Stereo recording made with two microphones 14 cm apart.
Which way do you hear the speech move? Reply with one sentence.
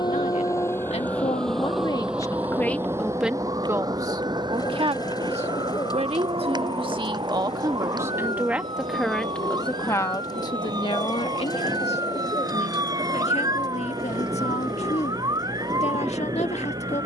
You can hear the speech move from left to right and back again.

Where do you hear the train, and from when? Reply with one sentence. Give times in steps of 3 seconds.
You can hear the train in the centre from 0 s and on the right from 3 s.